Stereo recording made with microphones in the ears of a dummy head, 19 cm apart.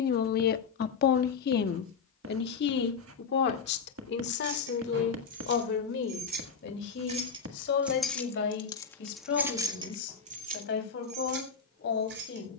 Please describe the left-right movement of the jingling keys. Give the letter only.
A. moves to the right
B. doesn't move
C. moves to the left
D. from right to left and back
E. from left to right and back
D.